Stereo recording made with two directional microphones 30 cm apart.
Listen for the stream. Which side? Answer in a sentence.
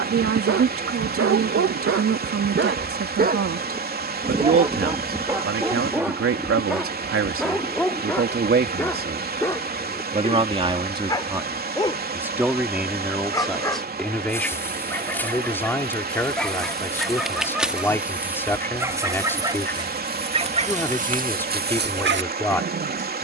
You can hear the stream on the right.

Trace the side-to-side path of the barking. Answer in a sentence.
You can hear the barking go left and come back.